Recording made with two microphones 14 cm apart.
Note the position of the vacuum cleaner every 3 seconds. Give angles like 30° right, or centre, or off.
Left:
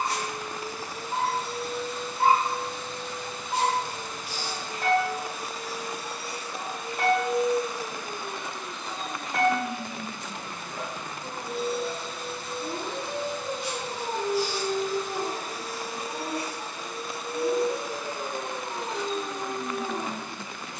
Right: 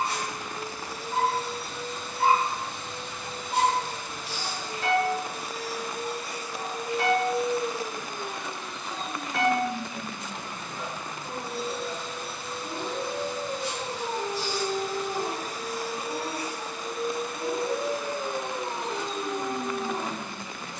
70° right, 70° right, 30° right, 10° left, 20° left, 40° right, 70° right.